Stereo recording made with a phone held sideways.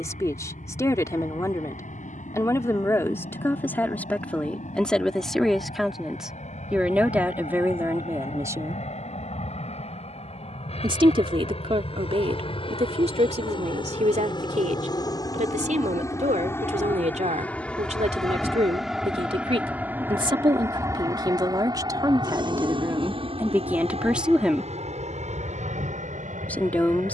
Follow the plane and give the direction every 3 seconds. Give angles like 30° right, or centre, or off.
60° left, 60° left, 50° left, 50° left, 40° left, 20° left, 10° right, 30° right, 50° right.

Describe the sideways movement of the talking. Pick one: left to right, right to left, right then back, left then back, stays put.
right then back.